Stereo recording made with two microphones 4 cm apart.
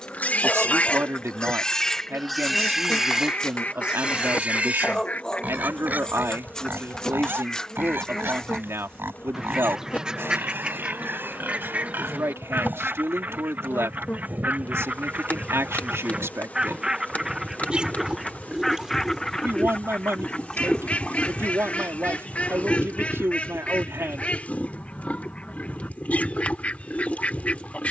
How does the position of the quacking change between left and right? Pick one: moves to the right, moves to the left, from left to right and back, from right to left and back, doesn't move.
from left to right and back.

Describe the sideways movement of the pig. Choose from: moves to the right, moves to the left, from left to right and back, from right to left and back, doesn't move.
from left to right and back.